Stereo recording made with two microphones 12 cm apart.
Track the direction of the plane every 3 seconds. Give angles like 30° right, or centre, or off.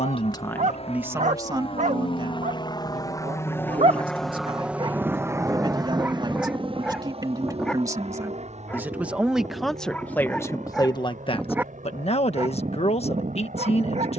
50° left, centre, 50° right, 60° right, 70° right.